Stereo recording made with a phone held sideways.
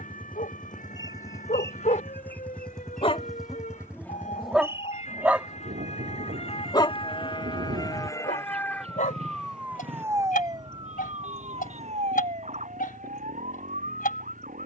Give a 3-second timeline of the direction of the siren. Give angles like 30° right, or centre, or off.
70° left, 60° left, 30° left, 20° right, 60° right.